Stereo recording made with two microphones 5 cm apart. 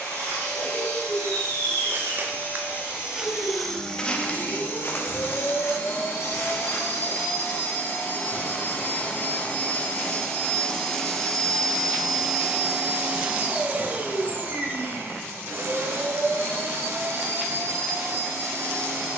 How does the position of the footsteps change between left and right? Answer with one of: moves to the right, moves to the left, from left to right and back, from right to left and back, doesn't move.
moves to the left.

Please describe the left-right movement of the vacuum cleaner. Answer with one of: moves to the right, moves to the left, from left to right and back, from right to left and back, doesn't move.
moves to the right.